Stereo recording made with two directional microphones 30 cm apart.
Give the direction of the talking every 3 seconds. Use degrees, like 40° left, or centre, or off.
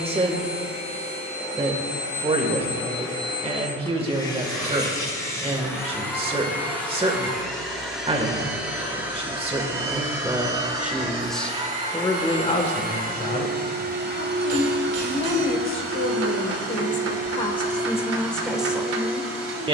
20° right, 20° right, 20° right, 10° right, 30° left, 30° left, centre.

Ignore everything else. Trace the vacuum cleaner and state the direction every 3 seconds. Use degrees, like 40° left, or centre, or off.
20° left, 10° left, centre, 10° right, 30° right, 50° right, 60° right.